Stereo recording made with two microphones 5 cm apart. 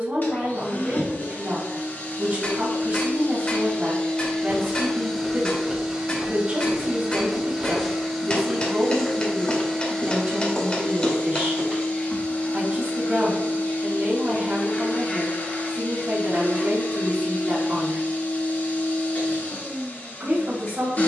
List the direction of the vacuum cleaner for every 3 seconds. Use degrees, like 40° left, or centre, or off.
40° left, 10° left, 10° right, 20° left, 40° left, 40° left, 40° left.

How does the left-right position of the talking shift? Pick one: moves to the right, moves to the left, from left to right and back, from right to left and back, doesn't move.
doesn't move.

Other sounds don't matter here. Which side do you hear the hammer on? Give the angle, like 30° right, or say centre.
20° left.